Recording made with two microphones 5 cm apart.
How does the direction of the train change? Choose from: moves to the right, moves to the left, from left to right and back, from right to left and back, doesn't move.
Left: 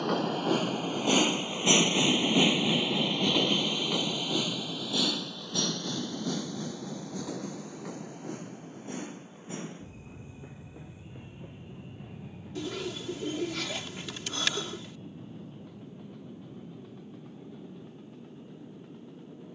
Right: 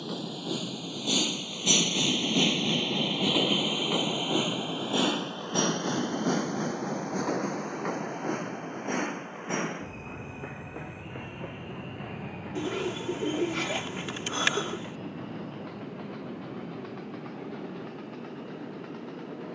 moves to the right.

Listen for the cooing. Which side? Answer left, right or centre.
right.